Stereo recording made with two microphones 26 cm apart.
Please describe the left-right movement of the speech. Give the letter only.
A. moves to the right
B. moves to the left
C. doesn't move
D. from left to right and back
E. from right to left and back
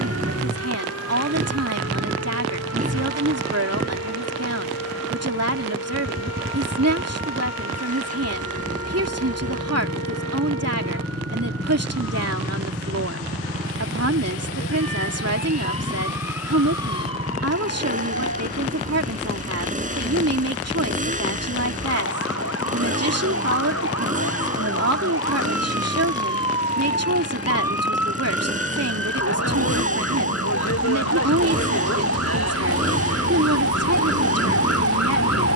C.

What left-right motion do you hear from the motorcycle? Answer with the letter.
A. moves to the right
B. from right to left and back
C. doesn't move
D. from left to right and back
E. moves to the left
C.